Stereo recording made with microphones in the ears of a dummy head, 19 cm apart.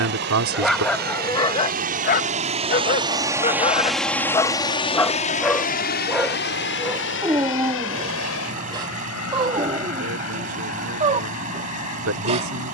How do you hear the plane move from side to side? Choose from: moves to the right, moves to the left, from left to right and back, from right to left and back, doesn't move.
moves to the left.